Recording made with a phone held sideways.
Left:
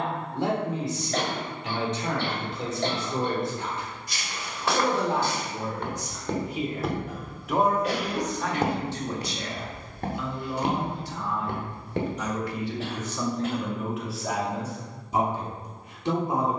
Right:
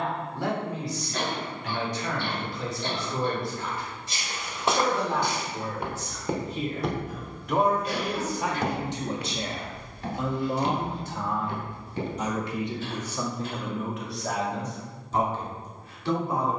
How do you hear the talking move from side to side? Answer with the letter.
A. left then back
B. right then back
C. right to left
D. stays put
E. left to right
B.